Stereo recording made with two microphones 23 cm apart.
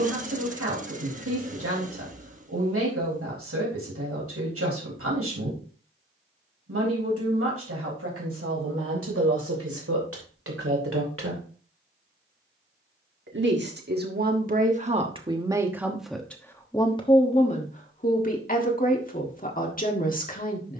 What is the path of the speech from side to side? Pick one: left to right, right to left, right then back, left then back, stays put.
right to left.